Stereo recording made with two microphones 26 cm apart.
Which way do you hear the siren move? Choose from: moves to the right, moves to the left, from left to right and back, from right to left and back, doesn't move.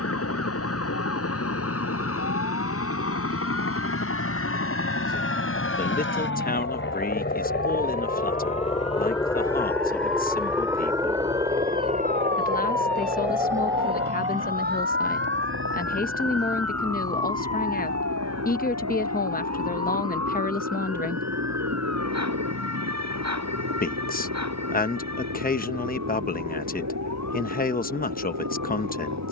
moves to the right.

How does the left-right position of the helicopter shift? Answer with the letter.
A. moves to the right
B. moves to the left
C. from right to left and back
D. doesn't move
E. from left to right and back
A.